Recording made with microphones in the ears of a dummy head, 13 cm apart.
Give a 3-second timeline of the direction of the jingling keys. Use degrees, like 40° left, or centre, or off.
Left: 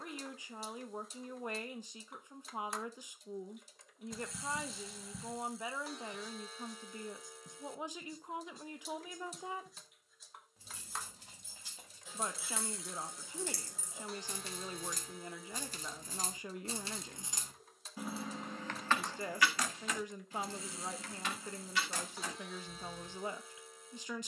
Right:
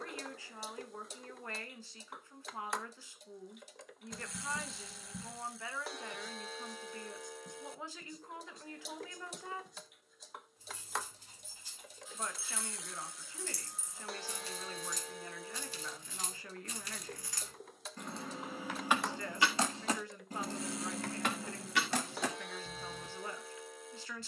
off, off, off, 70° left, 60° left, 30° left, 20° right, 50° right.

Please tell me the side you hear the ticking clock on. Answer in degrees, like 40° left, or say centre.
50° right.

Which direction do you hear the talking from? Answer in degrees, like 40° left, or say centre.
20° left.